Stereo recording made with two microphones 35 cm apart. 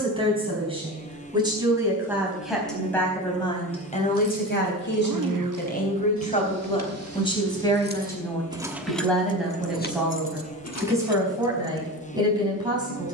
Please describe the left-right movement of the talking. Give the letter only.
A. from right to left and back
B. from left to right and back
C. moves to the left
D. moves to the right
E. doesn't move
A.